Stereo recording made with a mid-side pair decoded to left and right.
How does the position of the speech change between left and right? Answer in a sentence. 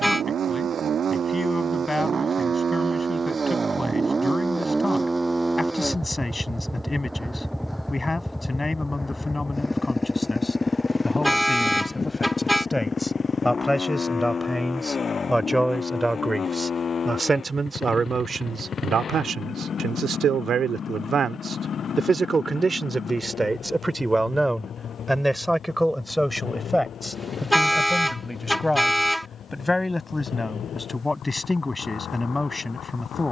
In this clip you hear the speech go right and come back.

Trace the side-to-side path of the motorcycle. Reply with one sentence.
You can hear the motorcycle travel towards the left.